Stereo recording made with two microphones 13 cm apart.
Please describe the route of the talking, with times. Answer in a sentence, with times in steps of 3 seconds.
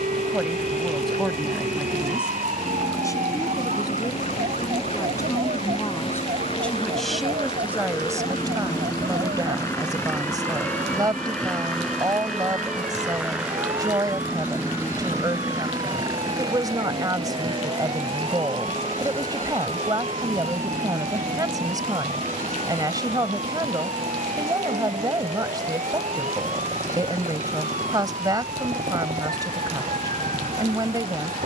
You can hear the talking in the centre from 0 s, on the left from 3 s, in the centre from 6 s and on the right from 9 s.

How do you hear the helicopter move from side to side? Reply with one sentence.
You can hear the helicopter move to the right.